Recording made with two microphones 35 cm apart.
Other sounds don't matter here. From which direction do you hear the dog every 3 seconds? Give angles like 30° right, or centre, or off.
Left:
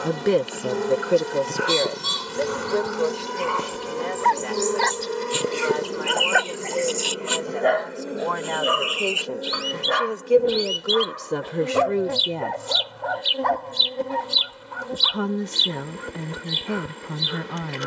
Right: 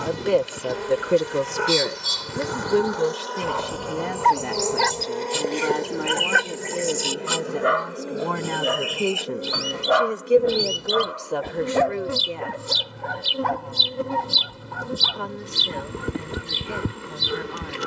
60° right, 40° right, 20° right, 20° left, 40° right, 60° right.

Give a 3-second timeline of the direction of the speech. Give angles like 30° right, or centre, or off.
10° right, 50° right, 50° right, 10° left, 50° left, 60° left.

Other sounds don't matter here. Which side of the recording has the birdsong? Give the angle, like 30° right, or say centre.
50° right.